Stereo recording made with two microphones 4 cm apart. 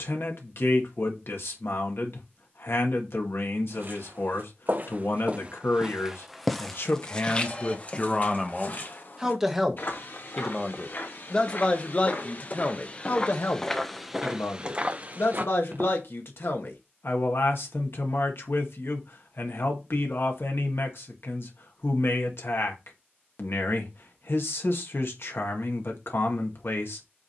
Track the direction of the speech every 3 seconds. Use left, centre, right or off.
left, left, left, centre, left, left, left, left, left.